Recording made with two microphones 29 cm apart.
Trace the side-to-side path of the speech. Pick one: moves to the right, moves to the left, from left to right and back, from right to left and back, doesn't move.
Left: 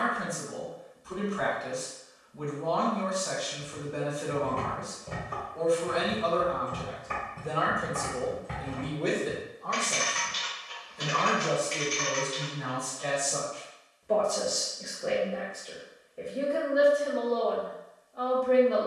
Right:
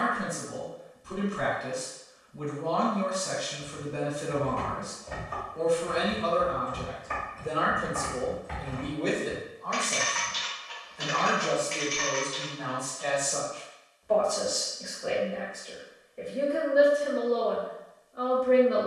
from right to left and back.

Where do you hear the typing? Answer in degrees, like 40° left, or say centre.
40° left.